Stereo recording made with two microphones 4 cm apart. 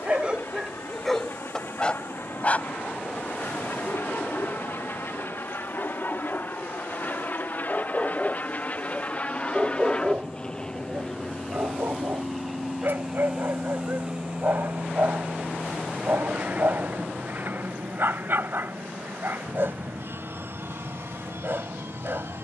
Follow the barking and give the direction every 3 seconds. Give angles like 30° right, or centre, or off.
10° left, 50° left, 20° left, 30° right, 50° right, 50° right, 50° right, 50° right.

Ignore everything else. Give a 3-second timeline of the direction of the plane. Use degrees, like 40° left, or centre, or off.
70° left, 60° left, 40° left, 20° left, 10° right, 40° right, 50° right, 60° right.